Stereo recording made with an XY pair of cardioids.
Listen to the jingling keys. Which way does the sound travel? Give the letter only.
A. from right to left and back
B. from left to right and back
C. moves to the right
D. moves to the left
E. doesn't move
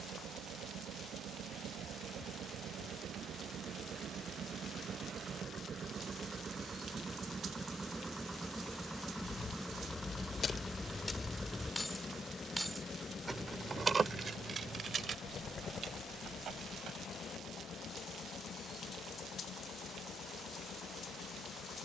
C.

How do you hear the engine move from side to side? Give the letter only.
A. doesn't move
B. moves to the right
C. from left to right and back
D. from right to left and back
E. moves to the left
E.